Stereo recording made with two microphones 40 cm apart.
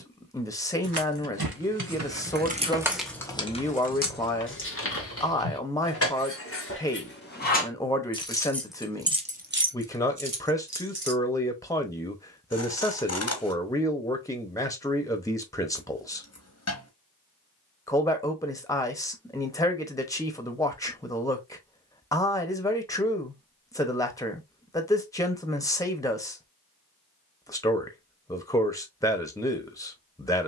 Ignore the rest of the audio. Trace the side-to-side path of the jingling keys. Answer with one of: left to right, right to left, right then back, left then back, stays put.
left then back.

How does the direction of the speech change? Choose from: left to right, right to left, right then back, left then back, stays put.
stays put.